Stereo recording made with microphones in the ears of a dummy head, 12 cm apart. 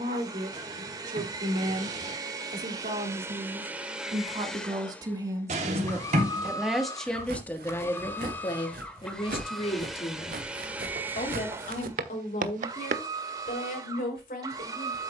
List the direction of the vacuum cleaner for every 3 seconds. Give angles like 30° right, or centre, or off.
30° right, centre, 20° left, 10° right, 30° right.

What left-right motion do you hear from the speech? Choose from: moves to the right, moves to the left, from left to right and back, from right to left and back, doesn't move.
moves to the left.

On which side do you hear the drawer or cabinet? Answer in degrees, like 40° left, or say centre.
60° right.